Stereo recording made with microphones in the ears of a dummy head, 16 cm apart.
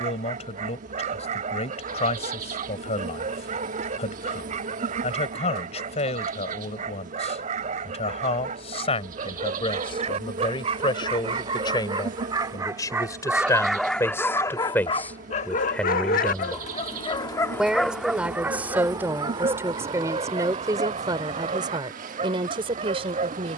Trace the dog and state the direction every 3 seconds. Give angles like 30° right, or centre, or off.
40° right, 40° right, 40° right, 40° right, centre, 30° left, 30° right, 40° right.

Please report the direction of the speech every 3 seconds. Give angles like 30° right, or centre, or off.
40° left, 40° left, 40° left, 30° left, 20° left, centre, 10° right, 30° right.